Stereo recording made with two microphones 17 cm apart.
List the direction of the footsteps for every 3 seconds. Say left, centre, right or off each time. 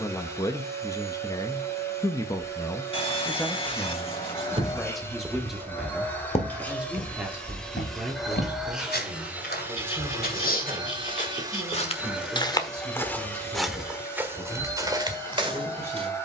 off, centre, left, left, centre, right.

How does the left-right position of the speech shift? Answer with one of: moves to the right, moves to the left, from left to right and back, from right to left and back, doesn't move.
moves to the right.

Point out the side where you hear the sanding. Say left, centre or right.
left.